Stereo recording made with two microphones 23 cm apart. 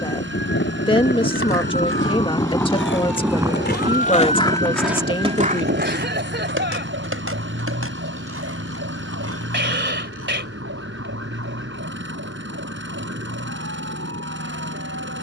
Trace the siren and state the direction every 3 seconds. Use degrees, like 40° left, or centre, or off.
40° left, 30° right, 60° right, 70° right, 70° right.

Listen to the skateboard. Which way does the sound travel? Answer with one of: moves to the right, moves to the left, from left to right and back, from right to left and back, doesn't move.
moves to the right.